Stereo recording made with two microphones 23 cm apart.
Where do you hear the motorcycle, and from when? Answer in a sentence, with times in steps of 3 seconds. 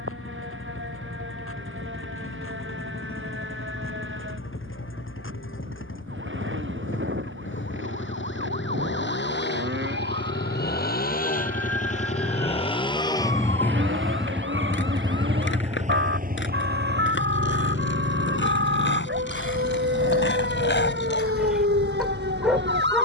You can hear the motorcycle on the left from 0 s, in the centre from 12 s and on the right from 15 s.